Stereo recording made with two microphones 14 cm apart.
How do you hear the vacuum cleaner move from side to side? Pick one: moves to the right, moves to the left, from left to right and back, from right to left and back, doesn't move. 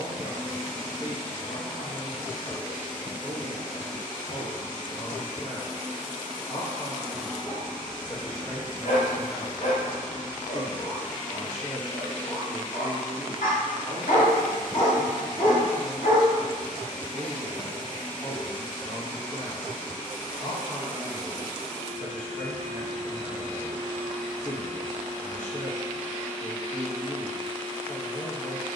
doesn't move.